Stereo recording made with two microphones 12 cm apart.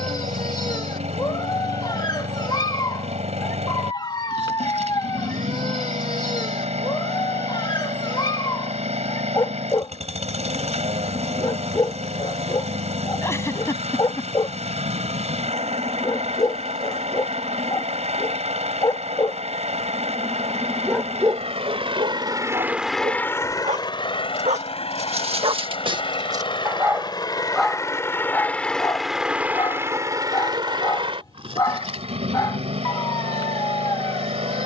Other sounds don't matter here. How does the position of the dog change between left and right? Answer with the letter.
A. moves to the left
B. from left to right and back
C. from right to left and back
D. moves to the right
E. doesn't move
B.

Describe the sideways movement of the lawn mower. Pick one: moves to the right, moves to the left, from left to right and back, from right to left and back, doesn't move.
from right to left and back.